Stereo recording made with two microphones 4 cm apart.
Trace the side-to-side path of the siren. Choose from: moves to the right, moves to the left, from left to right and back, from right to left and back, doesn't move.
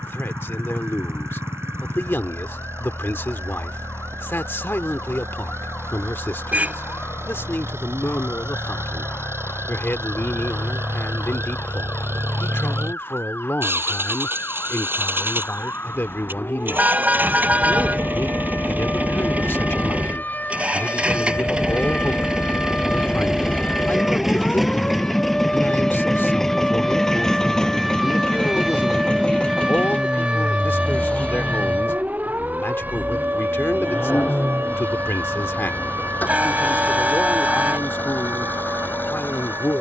moves to the right.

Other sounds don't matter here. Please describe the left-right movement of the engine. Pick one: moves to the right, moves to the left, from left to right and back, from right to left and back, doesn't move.
moves to the left.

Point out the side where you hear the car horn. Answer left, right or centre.
right.